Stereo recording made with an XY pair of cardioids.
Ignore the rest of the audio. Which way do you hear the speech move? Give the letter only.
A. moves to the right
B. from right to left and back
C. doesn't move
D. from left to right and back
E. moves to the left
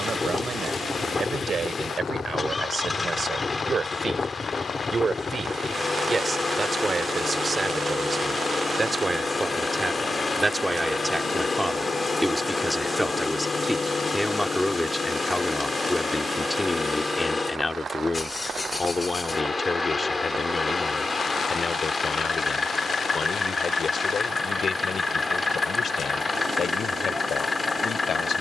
E.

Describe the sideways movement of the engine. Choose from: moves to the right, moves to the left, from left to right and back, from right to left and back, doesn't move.
doesn't move.